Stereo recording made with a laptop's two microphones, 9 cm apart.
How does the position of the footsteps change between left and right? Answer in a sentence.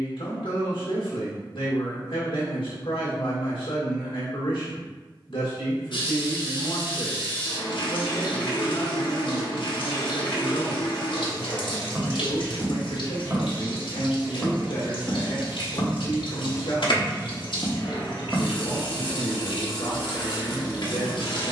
In this clip you hear the footsteps move from right to left and back again.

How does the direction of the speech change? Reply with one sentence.
You can hear the speech stay in one place.